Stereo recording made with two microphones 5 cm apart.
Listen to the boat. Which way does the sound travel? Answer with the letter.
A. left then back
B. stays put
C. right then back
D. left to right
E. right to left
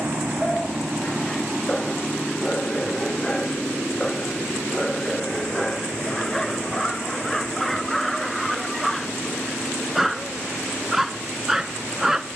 E.